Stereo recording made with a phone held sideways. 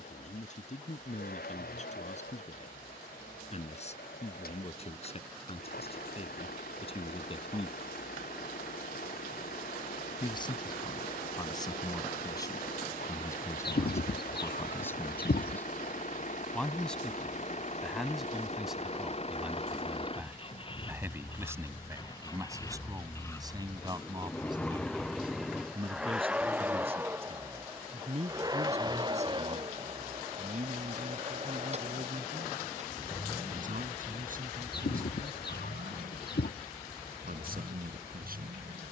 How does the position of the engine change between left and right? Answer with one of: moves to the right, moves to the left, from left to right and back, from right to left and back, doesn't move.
moves to the right.